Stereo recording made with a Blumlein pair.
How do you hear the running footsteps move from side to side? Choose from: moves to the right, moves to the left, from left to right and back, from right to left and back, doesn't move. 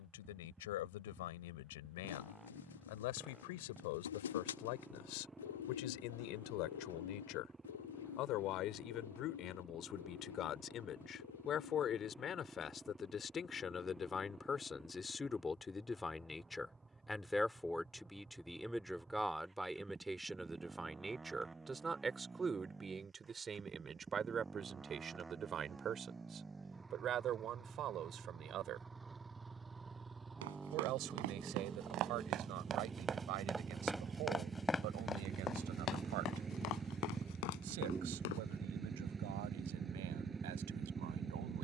moves to the left.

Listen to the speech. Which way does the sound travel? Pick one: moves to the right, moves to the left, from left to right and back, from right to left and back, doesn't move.
moves to the right.